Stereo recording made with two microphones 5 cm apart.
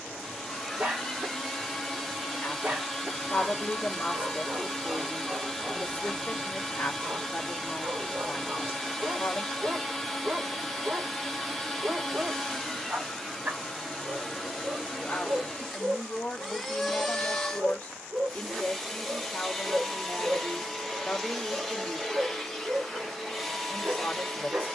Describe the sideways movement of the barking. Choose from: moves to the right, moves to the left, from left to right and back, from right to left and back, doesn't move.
doesn't move.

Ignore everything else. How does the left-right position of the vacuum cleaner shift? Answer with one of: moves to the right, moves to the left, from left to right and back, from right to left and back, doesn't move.
doesn't move.